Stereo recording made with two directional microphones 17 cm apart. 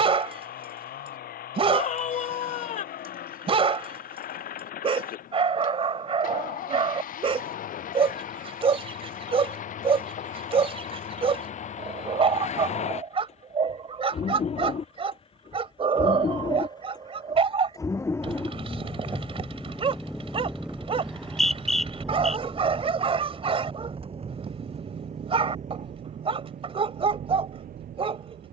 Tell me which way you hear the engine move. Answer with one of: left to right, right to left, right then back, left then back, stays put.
left to right.